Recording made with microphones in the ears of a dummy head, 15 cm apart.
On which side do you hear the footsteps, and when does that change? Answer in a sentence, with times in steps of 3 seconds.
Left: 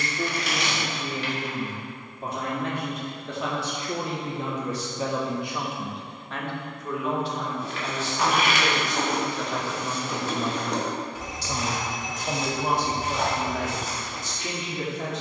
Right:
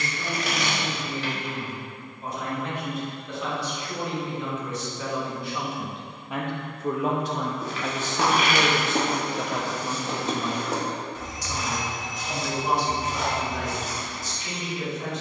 You can hear the footsteps not at all from 0 s, on the right from 6 s, in the centre from 9 s and on the left from 12 s.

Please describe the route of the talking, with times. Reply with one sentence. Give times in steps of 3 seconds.
In this clip you hear the talking on the left from 0 s, on the right from 6 s, in the centre from 9 s and on the left from 12 s.